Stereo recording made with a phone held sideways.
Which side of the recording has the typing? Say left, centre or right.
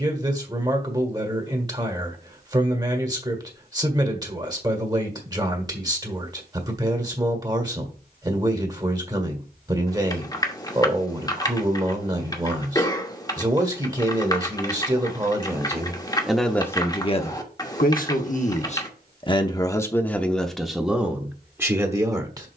left.